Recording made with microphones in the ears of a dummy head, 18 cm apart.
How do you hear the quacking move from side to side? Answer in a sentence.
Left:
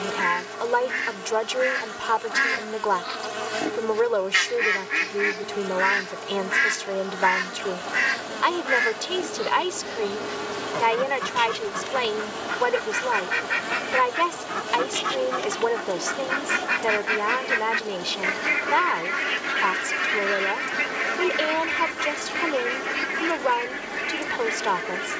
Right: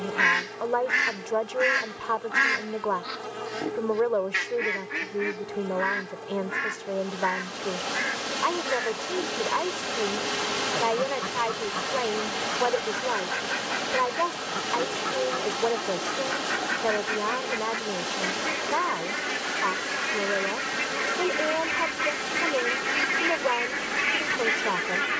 You can hear the quacking go left and come back.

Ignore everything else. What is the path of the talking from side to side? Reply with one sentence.
In this clip you hear the talking stay put.